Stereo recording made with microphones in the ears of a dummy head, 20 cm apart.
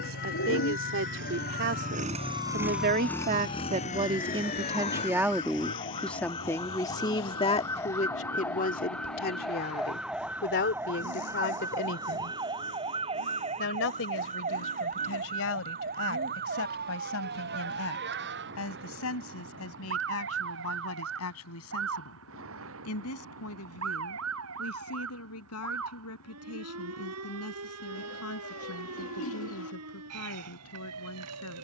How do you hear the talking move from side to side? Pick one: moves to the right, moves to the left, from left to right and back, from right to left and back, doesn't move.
moves to the left.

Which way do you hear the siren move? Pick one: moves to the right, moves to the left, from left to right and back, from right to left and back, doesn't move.
moves to the right.